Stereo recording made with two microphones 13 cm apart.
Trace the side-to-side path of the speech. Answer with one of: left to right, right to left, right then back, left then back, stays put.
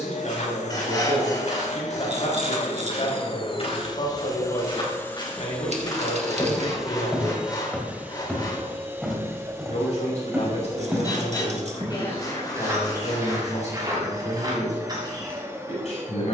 stays put.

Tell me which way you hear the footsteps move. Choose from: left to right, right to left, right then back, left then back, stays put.
left to right.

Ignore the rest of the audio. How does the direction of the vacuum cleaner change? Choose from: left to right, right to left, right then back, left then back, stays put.
left to right.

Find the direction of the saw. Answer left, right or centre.
left.